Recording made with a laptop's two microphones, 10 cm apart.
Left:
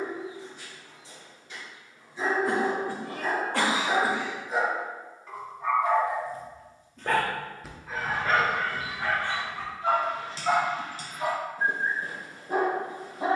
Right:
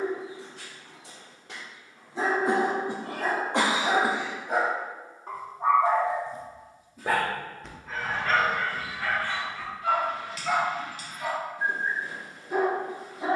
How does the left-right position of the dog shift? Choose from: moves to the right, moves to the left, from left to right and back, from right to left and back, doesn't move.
moves to the left.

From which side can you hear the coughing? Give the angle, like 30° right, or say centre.
20° right.